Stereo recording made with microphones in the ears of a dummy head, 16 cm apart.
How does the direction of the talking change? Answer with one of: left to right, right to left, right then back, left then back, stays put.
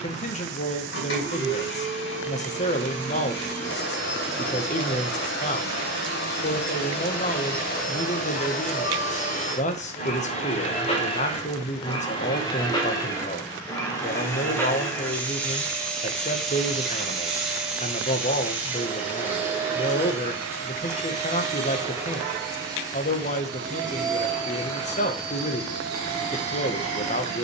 stays put.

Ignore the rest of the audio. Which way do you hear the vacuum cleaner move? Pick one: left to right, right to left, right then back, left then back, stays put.
left to right.